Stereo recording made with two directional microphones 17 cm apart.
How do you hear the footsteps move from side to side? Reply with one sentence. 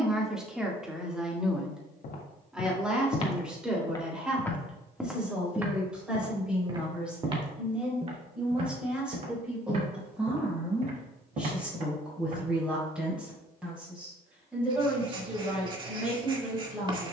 In this clip you hear the footsteps travel towards the right.